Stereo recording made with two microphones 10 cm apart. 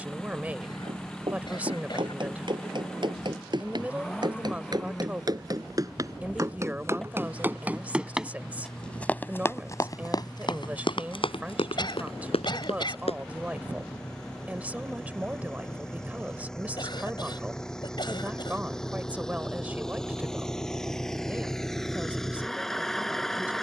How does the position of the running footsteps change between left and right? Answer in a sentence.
In this clip you hear the running footsteps go from the right side to the left.